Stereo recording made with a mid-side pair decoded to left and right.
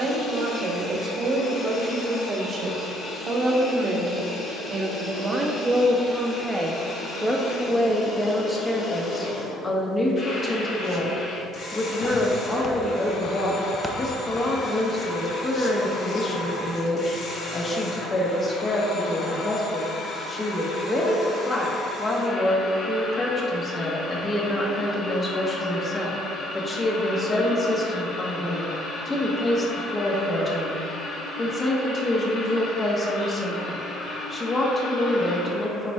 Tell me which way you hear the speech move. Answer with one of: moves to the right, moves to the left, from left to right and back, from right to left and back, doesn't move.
moves to the left.